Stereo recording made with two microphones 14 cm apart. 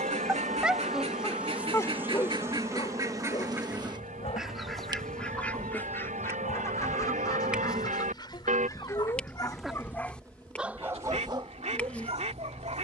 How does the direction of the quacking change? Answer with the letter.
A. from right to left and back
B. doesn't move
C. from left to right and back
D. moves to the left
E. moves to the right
A.